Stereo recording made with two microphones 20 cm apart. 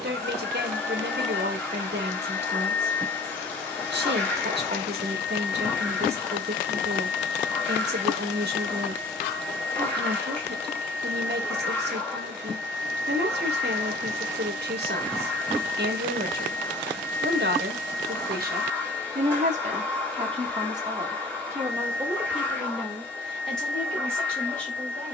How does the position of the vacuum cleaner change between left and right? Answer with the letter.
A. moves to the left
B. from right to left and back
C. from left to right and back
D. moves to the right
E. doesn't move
E.